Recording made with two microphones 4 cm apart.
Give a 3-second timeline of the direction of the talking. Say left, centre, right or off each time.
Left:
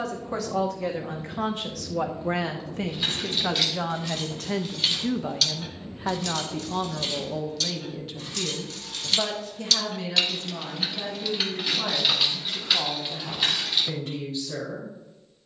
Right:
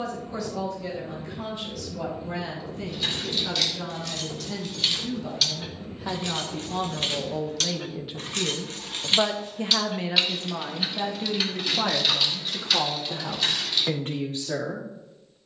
left, left, centre, right, right.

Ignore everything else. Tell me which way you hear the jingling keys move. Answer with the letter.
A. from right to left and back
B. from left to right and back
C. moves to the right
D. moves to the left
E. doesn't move
B.